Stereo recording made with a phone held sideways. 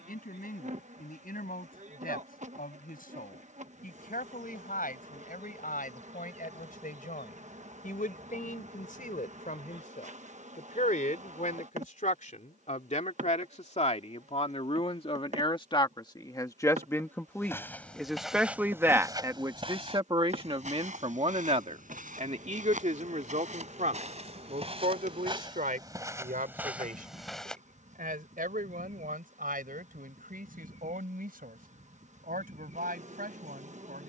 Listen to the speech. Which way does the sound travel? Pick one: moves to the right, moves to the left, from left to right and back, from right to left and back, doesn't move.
moves to the right.